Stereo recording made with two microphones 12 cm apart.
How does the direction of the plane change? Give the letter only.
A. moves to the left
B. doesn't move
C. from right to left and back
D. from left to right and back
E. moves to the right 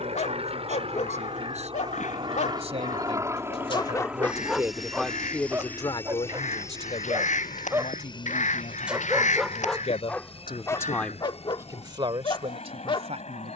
A.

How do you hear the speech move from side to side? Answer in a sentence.
You can hear the speech go left and come back.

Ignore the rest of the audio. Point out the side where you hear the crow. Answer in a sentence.
You can hear the crow on the left.